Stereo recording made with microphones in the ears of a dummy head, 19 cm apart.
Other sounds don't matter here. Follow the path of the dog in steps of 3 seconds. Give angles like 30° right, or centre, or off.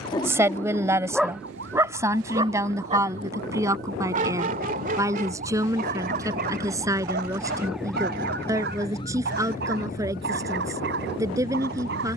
centre, 40° right, 50° right, 50° right.